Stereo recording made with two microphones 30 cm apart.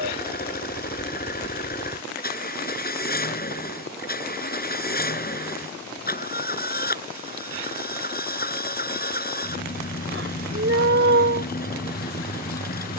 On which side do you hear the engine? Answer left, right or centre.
left.